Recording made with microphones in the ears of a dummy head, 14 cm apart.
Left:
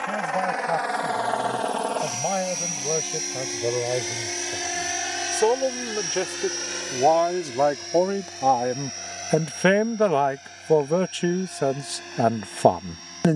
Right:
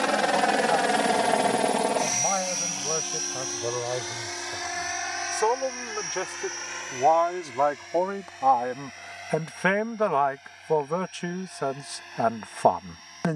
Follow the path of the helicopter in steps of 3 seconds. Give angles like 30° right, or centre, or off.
20° right, 30° left, 50° left, 50° left, 60° left.